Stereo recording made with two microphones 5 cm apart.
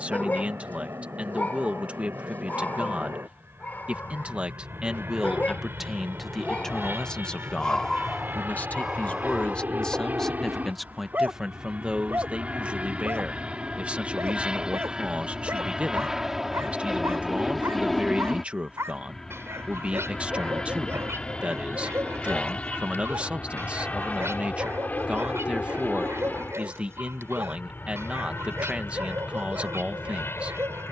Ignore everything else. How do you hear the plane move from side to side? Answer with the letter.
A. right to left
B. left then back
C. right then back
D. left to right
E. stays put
A.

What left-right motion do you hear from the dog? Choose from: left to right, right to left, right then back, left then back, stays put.
left to right.